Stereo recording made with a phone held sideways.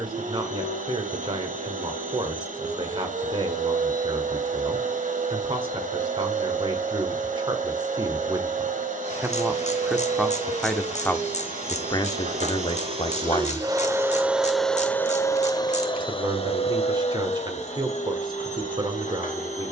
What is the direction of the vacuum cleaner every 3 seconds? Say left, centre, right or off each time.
right, right, right, right, right, left, left.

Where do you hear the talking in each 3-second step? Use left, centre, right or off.
right, right, right, centre, left, right, right.